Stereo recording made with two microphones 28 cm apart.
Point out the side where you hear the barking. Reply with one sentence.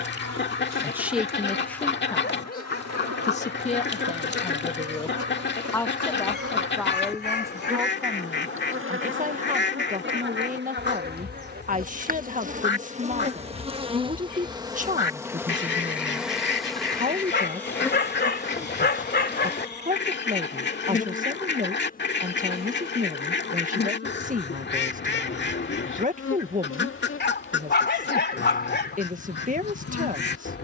In this clip you hear the barking on the left.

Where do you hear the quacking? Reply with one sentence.
You can hear the quacking on the left.